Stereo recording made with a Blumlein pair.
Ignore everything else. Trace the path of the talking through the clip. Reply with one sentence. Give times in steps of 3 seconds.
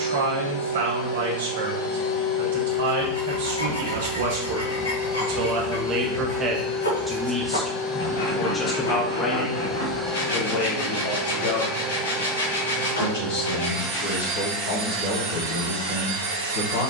You can hear the talking on the right from 0 s, in the centre from 6 s and on the left from 9 s.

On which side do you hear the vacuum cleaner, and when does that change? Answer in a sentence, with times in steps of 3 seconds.
You can hear the vacuum cleaner on the left from 0 s, in the centre from 9 s and on the right from 12 s.